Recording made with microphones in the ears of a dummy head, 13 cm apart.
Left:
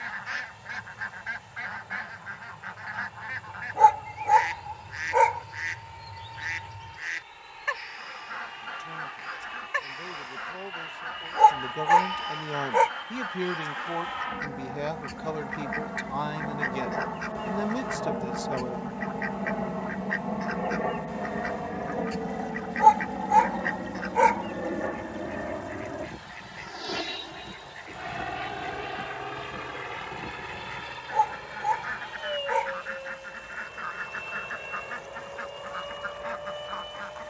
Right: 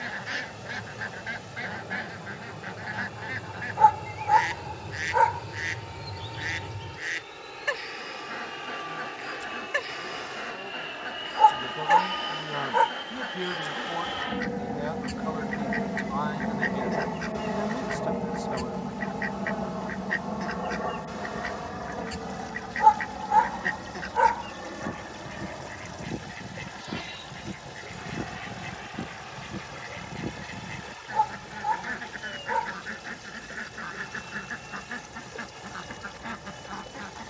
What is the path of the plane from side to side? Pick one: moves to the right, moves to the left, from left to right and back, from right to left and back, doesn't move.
moves to the left.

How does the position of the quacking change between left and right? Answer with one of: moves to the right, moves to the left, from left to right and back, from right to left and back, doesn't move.
doesn't move.